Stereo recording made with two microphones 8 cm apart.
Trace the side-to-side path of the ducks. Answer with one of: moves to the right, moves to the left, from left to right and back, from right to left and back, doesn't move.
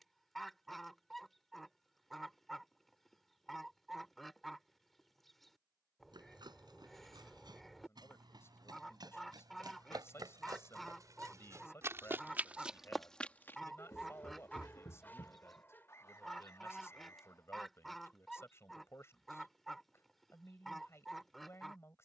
doesn't move.